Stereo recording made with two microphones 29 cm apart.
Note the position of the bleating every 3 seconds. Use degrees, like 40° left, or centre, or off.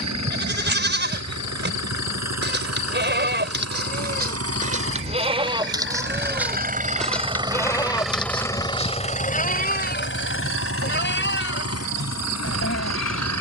40° right, 30° right, 10° left, 40° left, 50° left.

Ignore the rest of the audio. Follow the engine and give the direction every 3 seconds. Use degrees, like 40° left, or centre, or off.
70° right, 50° right, 10° right, 50° left, 70° left.